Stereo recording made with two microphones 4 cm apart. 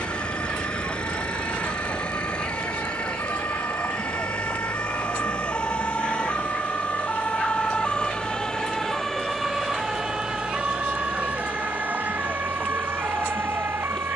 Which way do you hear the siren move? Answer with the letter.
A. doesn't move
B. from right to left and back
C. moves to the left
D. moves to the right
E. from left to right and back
D.